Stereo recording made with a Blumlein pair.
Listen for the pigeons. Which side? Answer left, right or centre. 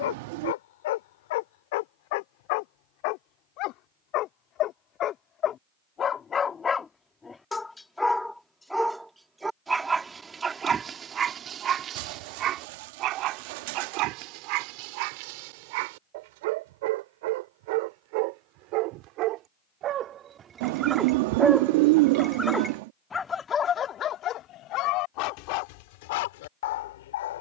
right.